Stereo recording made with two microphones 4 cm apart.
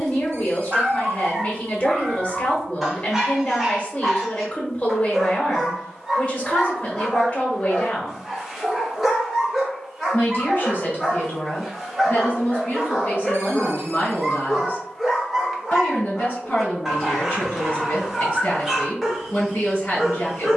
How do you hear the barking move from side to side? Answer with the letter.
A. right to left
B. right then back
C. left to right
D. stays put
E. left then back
D.